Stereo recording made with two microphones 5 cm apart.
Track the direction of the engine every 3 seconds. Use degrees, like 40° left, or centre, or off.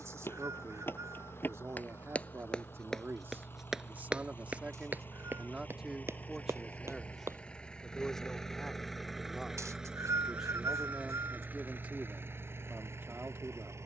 50° left, 40° left, 20° left, 20° right, 50° right.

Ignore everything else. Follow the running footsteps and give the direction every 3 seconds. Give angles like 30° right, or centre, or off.
40° left, 20° right, 60° right, off, off.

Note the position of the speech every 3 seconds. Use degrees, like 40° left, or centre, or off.
60° right, 30° right, centre, 10° right, 40° right.